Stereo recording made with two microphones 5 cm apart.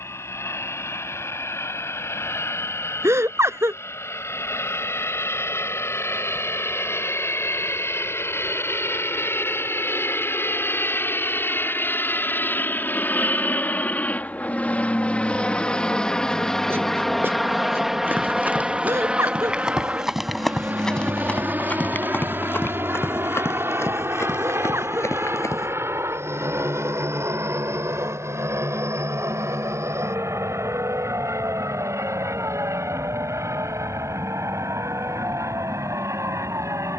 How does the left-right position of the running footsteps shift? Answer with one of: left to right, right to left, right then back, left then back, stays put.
right to left.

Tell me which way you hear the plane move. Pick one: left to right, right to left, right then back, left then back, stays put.
left to right.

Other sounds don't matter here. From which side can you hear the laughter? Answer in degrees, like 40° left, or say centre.
70° right.